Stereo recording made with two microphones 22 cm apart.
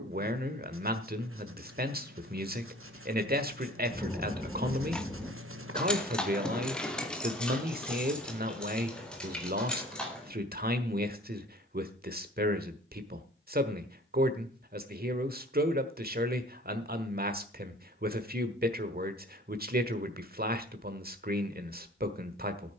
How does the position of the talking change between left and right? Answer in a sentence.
You can hear the talking stay in one place.